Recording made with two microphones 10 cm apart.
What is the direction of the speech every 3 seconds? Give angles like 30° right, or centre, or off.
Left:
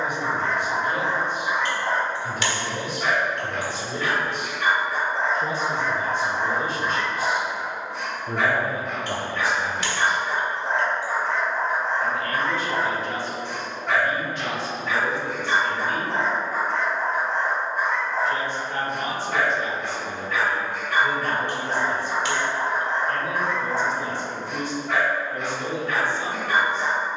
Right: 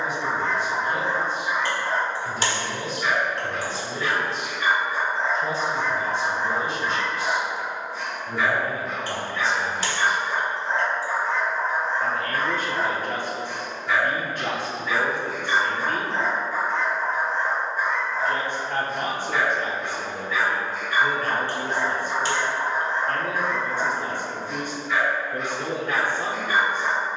60° left, 60° left, 40° left, 10° left, 50° right, 50° right, 50° right, 50° right, 50° right.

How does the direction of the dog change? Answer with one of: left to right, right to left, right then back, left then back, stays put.
stays put.